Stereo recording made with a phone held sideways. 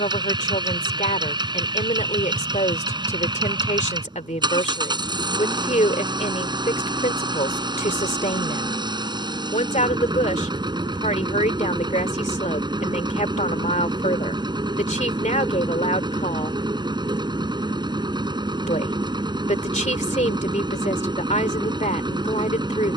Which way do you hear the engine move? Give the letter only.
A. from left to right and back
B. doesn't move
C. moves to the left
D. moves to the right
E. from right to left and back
B.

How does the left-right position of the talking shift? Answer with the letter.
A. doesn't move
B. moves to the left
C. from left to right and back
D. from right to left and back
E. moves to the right
A.